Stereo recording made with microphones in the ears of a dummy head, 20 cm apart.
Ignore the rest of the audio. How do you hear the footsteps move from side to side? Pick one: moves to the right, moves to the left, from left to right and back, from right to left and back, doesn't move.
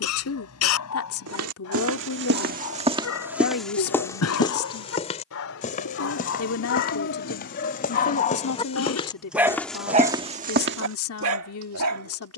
from right to left and back.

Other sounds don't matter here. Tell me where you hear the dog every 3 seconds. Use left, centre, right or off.
left, left, left, right.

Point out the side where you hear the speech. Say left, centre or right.
left.